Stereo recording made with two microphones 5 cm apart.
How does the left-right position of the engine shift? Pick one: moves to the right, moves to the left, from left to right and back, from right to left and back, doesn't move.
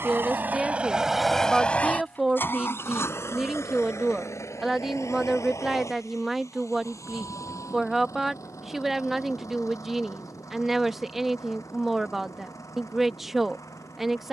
moves to the left.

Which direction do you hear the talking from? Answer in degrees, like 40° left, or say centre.
centre.